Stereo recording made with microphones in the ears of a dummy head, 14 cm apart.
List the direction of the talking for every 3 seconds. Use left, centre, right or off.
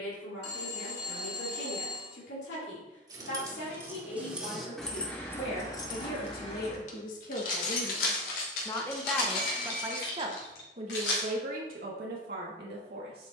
left, left, left, right, right.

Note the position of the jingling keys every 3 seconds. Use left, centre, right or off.
off, centre, left, left, off.